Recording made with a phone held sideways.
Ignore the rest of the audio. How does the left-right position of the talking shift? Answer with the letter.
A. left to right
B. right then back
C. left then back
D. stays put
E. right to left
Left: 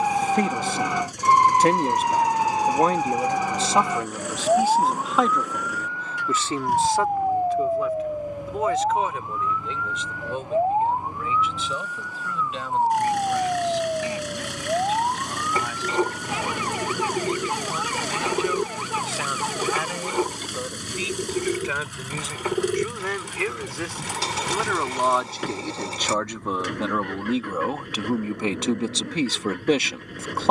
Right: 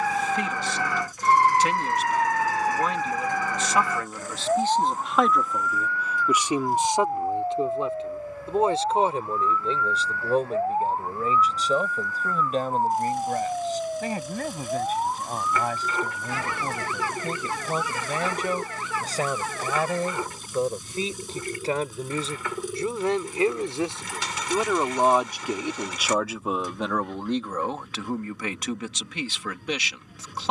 B.